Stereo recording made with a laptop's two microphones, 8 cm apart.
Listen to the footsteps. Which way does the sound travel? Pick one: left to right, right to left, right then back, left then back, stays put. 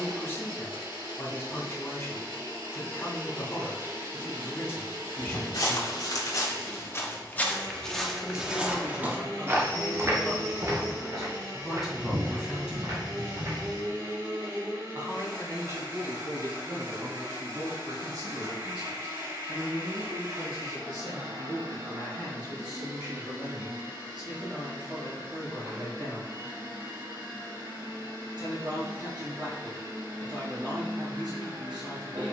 left to right.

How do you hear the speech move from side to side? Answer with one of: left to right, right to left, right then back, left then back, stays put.
left to right.